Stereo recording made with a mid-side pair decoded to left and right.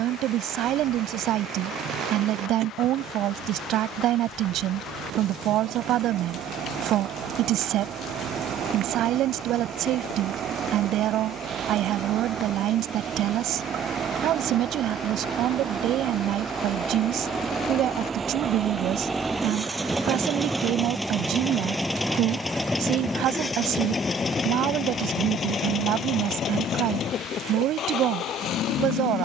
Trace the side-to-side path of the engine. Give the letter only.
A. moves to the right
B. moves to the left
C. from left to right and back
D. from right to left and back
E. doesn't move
B.